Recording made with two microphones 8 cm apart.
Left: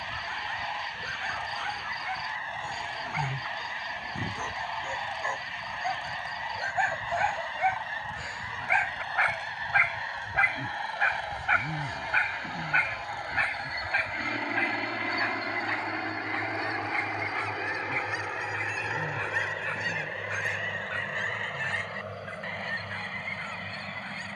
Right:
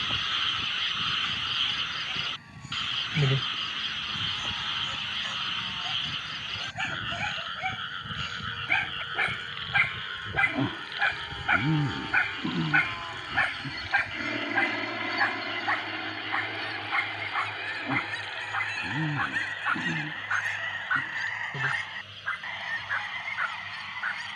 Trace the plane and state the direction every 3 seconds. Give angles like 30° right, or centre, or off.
80° right, 70° right, 70° right, 50° right, 20° right, 20° left, 40° left, 60° left.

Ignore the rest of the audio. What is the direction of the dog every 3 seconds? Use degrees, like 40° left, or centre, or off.
60° left, 50° left, 30° left, 10° left, 20° right, 30° right, 50° right, 50° right.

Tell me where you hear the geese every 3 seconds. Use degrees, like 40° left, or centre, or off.
80° left, 80° left, 80° left, 70° left, 50° left, 20° left, 10° left, 10° right.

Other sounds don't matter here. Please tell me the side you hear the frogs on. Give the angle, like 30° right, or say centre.
70° right.